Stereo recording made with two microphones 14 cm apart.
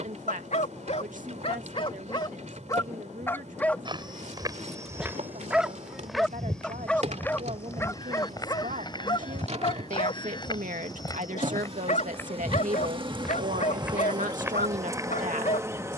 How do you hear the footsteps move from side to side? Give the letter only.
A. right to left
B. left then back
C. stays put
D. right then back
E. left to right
B.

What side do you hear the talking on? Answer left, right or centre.
right.